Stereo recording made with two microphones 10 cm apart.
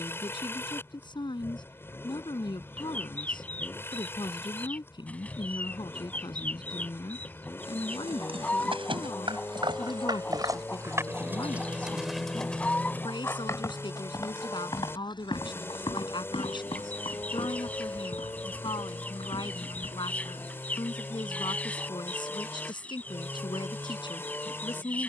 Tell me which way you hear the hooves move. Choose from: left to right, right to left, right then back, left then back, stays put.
right to left.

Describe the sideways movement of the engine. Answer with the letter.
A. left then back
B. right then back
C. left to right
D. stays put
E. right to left
D.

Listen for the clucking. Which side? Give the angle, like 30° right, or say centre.
10° left.